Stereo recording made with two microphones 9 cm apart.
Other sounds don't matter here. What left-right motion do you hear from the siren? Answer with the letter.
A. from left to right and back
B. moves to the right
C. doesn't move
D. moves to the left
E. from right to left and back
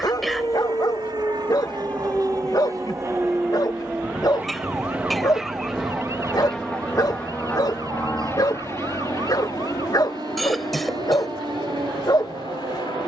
B.